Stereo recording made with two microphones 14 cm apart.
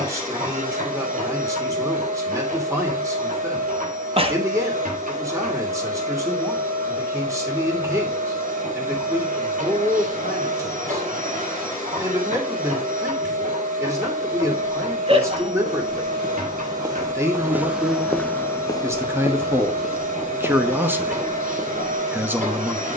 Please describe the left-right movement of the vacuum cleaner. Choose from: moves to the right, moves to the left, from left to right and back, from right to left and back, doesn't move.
doesn't move.